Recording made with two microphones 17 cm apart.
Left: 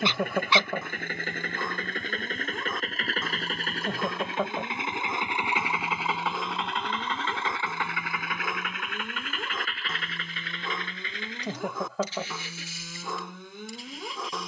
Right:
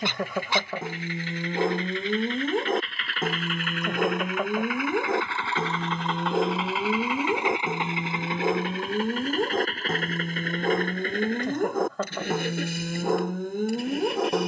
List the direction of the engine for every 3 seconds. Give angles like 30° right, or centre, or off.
50° left, 30° left, 10° right, 50° right, 60° right.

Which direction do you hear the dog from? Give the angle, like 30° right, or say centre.
50° right.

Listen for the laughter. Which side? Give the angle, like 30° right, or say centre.
centre.